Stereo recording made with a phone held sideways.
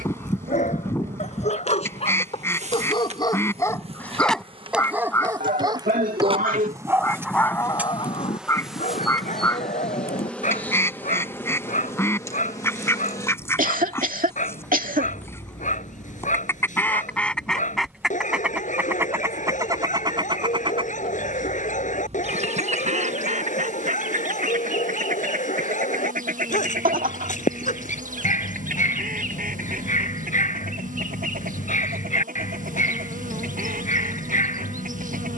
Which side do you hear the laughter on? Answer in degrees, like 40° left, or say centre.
70° right.